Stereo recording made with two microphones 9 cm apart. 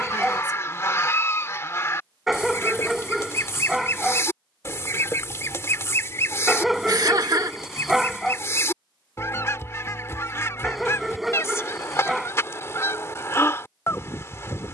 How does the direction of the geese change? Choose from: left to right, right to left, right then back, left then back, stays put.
stays put.